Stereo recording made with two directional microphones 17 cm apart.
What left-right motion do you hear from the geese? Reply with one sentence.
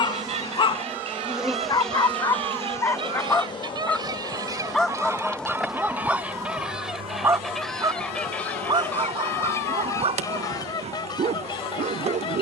In this clip you hear the geese move to the left.